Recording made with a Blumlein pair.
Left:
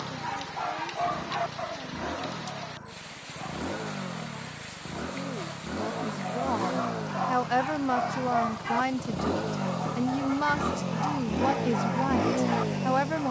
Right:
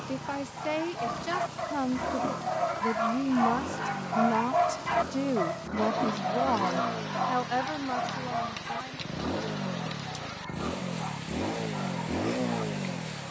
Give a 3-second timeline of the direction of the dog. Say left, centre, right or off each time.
centre, right, centre, left, left.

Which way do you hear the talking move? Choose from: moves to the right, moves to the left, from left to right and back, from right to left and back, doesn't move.
moves to the left.